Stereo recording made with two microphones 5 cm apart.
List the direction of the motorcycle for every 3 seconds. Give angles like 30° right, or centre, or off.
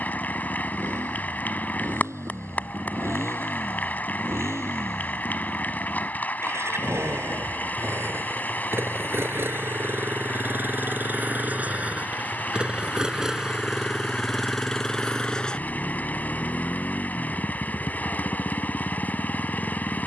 80° right, 70° right, 60° right, 40° right, 10° right, 30° left, 50° left.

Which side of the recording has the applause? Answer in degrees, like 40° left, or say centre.
40° left.